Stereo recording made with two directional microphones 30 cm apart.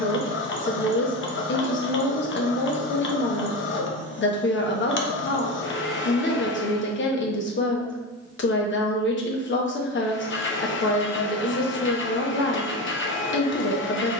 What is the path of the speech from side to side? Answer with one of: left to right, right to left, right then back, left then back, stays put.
stays put.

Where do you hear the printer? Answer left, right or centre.
left.